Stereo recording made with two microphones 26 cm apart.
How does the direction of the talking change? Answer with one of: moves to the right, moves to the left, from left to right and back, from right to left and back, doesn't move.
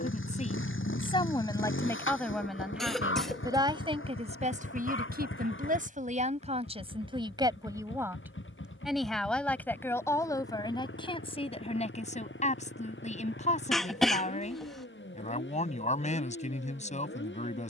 from left to right and back.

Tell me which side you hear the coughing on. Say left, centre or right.
centre.